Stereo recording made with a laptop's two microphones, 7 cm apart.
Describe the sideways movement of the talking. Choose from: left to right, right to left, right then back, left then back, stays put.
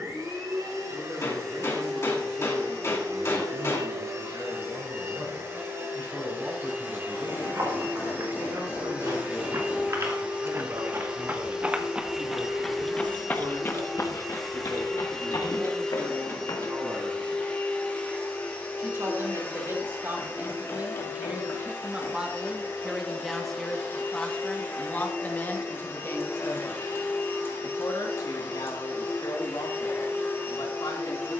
right to left.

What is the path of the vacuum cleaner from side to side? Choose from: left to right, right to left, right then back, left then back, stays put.
right to left.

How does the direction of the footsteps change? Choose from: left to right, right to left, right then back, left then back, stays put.
right to left.